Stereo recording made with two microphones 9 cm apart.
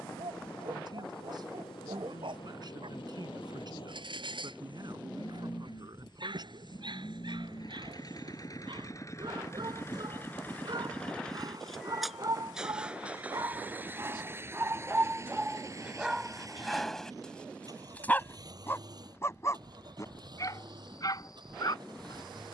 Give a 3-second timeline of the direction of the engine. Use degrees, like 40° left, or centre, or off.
80° left, 70° left, 50° left, 20° left, 20° right, 40° right, 50° right, 60° right.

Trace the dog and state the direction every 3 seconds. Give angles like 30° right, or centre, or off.
70° right, 70° right, 60° right, 50° right, 40° right, 10° right, 30° left, 50° left.